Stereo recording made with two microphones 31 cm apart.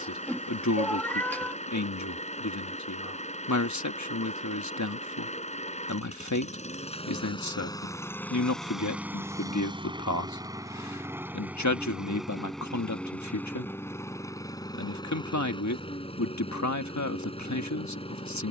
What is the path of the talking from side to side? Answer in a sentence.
You can hear the talking stay in one place.